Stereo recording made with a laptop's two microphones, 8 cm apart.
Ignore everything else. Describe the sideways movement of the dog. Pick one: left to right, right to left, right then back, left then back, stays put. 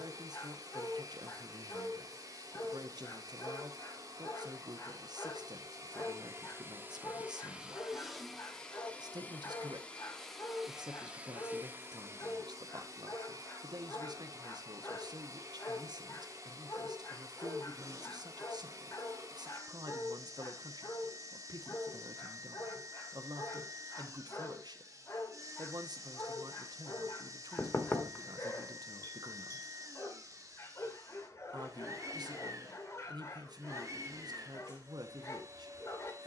stays put.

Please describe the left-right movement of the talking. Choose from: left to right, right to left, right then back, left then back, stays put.
stays put.